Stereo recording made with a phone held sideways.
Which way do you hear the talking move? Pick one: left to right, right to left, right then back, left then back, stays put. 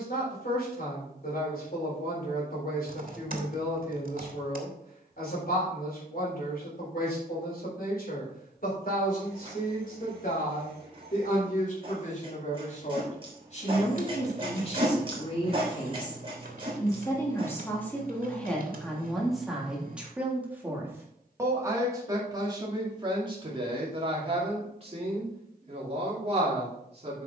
left to right.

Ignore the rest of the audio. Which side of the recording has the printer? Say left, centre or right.
right.